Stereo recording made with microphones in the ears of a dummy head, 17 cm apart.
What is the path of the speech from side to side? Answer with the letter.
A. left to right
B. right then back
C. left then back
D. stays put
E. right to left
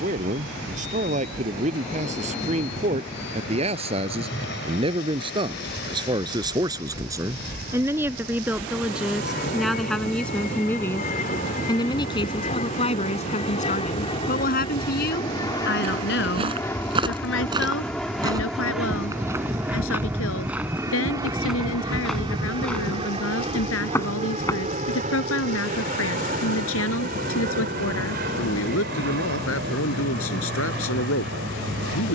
E.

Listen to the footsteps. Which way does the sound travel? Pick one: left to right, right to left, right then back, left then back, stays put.
right to left.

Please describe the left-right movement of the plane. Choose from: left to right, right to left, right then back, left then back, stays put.
left to right.